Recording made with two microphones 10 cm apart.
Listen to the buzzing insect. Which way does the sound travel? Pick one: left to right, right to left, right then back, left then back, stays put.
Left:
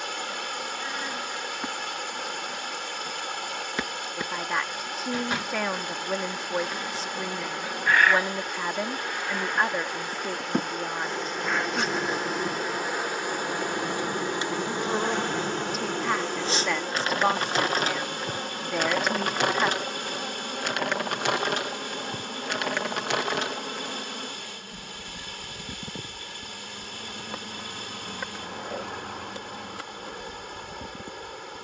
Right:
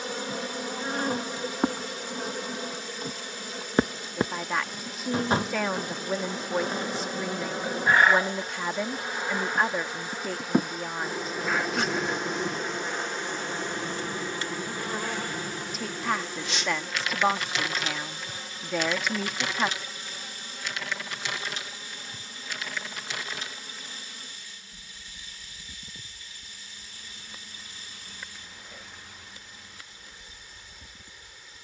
right to left.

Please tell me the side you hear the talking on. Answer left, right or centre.
centre.